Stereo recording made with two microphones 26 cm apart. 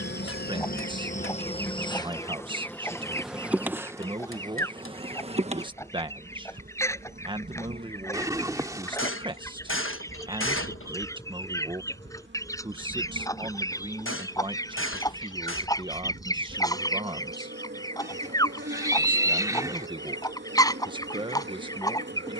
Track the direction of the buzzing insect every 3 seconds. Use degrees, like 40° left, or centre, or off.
20° left, 10° right, 30° right, 40° right, 40° right, 40° right, 40° right, 40° right.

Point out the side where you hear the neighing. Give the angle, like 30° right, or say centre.
10° right.